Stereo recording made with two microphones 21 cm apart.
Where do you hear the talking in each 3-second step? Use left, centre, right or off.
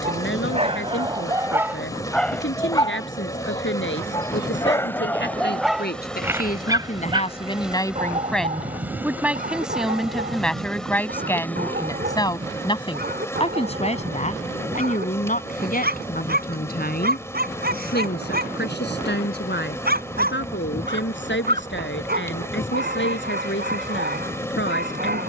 left, left, left, centre, left, left, left, left, left.